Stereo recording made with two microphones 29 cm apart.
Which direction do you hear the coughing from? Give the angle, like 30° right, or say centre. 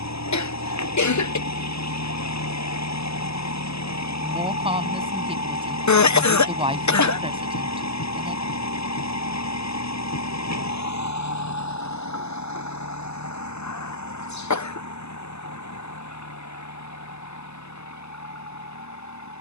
80° left.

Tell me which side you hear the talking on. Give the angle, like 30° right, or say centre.
20° right.